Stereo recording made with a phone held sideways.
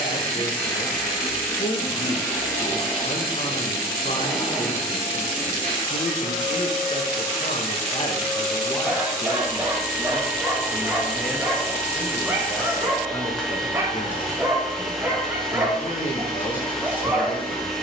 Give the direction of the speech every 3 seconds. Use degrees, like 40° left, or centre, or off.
50° left, 50° left, 40° left, centre, 30° left, 50° left.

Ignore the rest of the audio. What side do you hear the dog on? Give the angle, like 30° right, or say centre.
10° right.